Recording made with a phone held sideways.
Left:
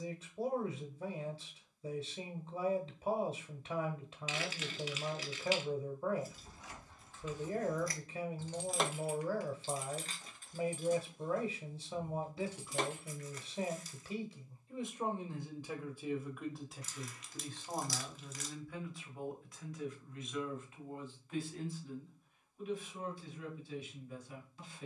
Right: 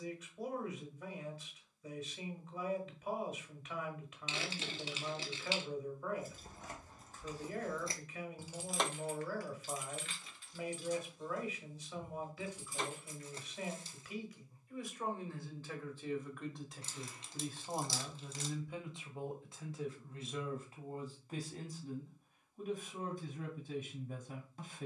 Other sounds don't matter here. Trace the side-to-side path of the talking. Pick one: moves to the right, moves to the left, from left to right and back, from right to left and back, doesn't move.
moves to the right.